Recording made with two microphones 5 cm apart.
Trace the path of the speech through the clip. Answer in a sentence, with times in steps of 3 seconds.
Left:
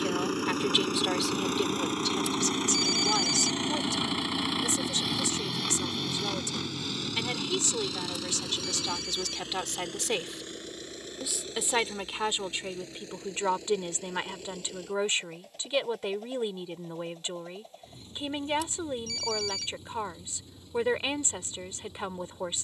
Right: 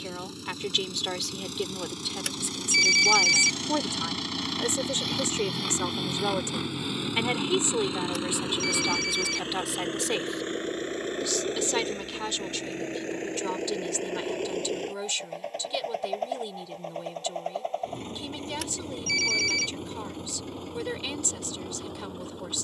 You can hear the speech in the centre from 0 s, on the right from 3 s, in the centre from 9 s and on the left from 12 s.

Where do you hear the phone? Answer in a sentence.
You can hear the phone on the right.